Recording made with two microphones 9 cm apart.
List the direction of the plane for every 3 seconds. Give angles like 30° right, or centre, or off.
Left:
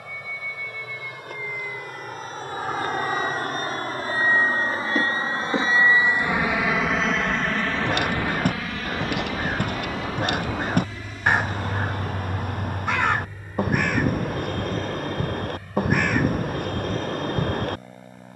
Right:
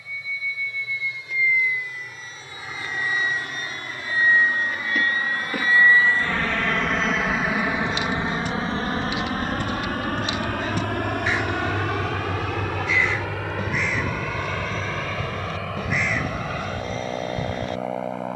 60° left, 40° left, 10° right, 50° right, 70° right, 70° right.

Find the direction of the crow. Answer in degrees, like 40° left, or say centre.
60° left.